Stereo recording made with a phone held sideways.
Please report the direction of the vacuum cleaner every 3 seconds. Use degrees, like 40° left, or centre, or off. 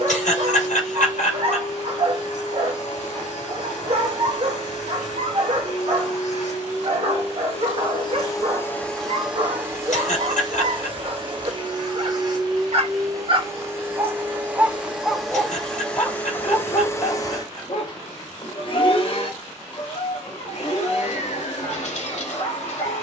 70° left, 70° left, 40° left, 30° right, 20° right, 10° left, 50° left, 60° left.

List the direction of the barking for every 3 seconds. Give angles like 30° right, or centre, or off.
50° right, 50° right, 50° right, 50° right, 40° right, 30° left, 60° left, 60° left.